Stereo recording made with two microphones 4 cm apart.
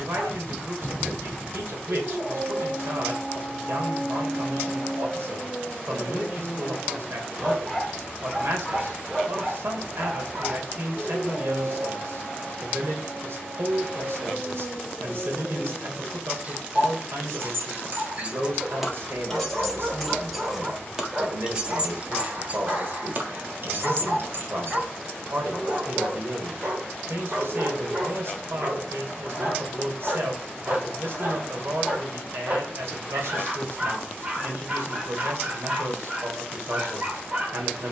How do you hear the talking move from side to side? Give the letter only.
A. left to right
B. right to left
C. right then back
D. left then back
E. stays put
E.